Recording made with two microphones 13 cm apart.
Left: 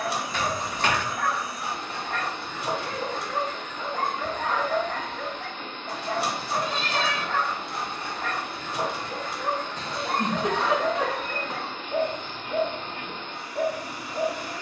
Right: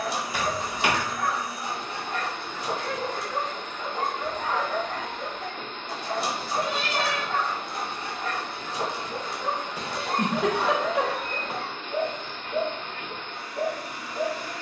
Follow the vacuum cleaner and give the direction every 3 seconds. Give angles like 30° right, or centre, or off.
50° right, 50° right, 40° right, 10° right, 10° left.